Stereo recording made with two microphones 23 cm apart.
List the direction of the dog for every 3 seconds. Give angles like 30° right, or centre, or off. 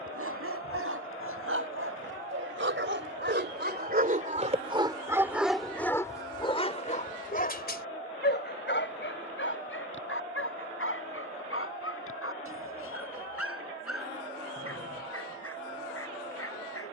70° right, 30° right, 40° left, 60° left, 70° left, 70° left.